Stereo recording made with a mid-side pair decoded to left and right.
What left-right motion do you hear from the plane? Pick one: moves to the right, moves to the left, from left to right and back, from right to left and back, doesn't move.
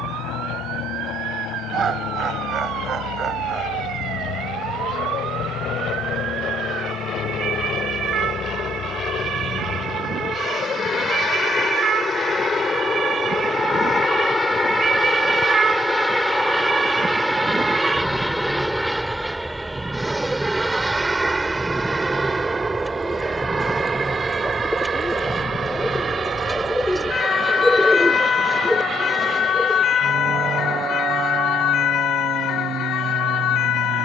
moves to the right.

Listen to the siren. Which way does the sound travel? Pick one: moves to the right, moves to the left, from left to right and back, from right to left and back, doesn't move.
moves to the left.